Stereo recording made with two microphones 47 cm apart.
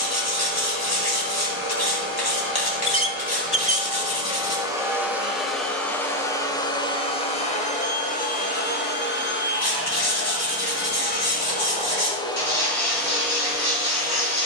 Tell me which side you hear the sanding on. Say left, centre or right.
left.